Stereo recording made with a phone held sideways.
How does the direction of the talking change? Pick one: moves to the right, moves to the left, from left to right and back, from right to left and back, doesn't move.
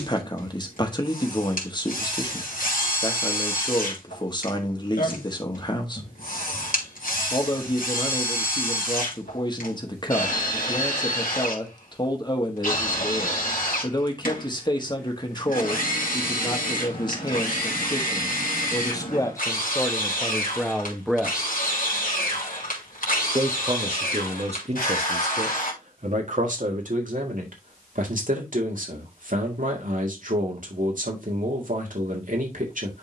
moves to the right.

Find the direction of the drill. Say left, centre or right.
left.